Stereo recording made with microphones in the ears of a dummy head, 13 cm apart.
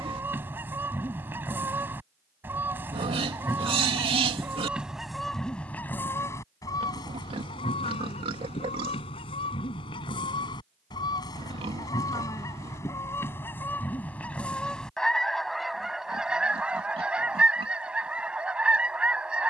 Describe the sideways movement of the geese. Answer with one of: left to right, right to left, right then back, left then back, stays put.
left then back.